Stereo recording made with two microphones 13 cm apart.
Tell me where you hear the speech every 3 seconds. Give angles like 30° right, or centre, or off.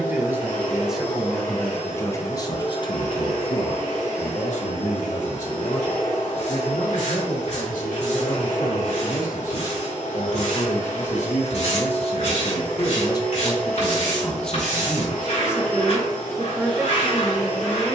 10° left, 60° left, 70° left, 60° left, 20° left, 10° right.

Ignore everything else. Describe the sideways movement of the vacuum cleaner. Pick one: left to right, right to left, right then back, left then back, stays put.
stays put.